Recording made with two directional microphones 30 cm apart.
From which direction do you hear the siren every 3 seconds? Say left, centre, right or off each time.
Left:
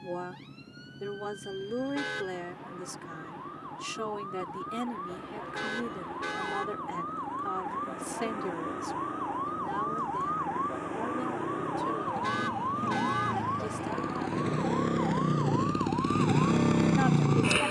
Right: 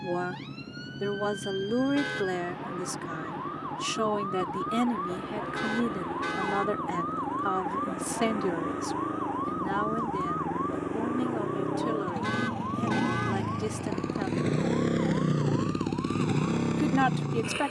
right, right, right, centre, left, left.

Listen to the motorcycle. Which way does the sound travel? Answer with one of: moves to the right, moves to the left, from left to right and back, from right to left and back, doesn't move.
moves to the left.